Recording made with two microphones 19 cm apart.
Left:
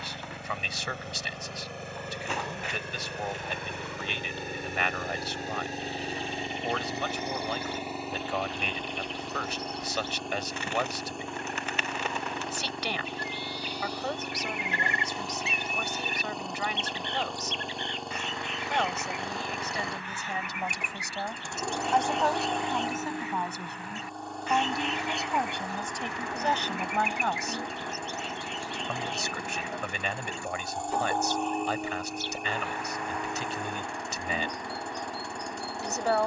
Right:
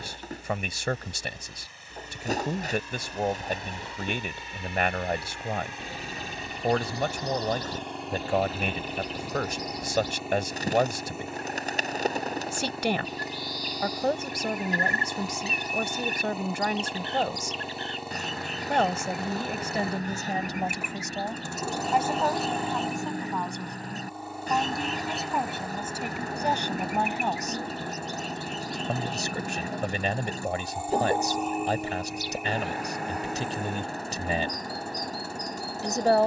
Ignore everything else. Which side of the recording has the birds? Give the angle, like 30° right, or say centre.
40° right.